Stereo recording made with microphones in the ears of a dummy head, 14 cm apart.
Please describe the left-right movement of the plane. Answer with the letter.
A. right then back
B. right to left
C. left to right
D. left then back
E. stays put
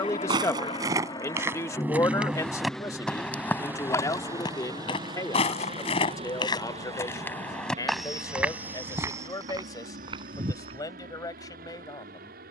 C.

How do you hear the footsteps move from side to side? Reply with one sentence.
You can hear the footsteps move from right to left and back again.